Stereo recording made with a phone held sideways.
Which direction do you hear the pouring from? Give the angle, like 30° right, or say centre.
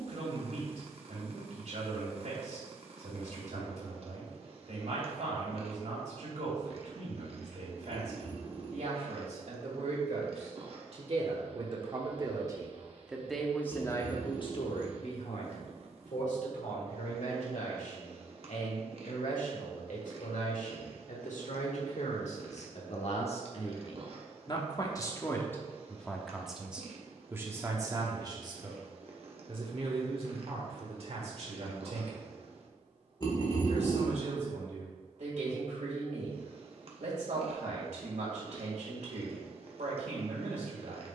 30° left.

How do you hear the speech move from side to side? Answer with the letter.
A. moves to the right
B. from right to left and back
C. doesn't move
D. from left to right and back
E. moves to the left
B.